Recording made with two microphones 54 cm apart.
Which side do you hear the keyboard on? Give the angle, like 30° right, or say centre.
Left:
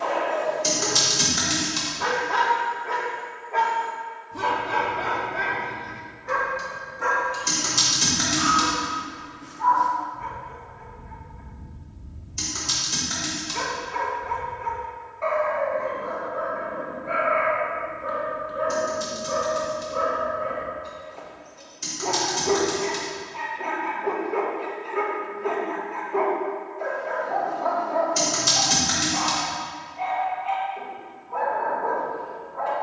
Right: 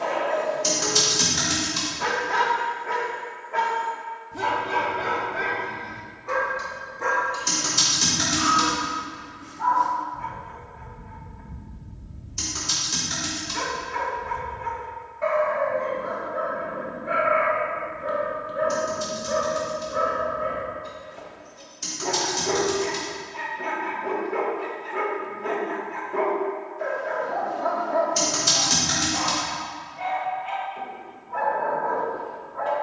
centre.